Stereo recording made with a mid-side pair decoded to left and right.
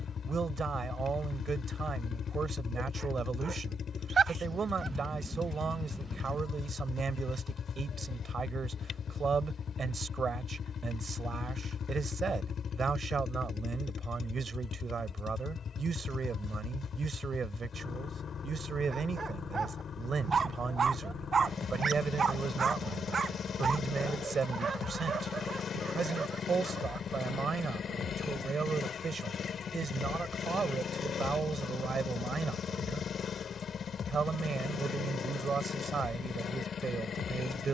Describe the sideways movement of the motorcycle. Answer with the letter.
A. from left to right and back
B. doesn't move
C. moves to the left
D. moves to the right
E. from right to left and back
B.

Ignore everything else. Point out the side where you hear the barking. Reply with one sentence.
You can hear the barking on the right.